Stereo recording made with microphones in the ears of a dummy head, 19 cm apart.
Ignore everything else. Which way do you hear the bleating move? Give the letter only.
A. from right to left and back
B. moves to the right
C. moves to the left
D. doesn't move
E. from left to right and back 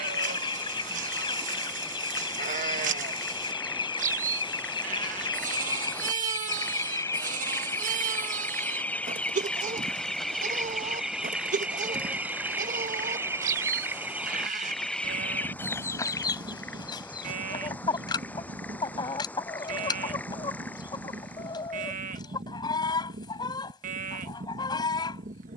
D.